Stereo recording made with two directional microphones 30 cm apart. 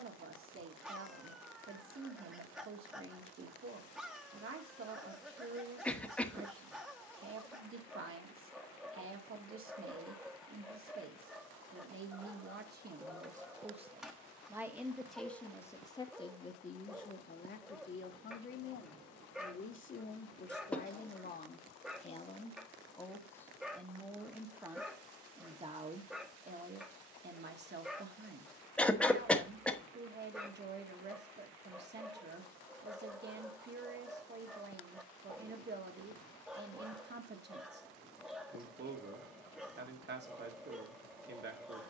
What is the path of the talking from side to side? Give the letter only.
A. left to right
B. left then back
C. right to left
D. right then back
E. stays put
B.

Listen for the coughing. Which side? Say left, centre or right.
centre.